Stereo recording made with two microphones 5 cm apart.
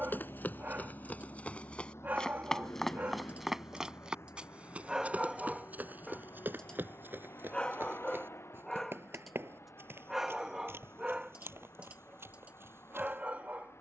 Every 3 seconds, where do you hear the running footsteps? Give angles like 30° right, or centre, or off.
30° left, 30° right, 60° right, 70° right, 70° right.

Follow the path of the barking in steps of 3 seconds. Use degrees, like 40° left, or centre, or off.
40° right, 20° right, 20° left, 20° right, 40° right.